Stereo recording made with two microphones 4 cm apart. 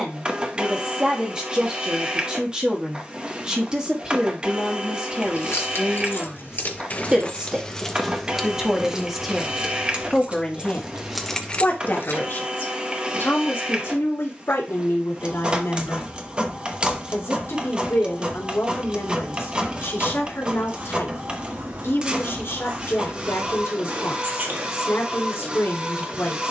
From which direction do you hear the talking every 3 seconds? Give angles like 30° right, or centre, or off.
20° right, 20° right, 20° right, 20° left, 60° left, 80° left, 80° left, 80° left, 80° left.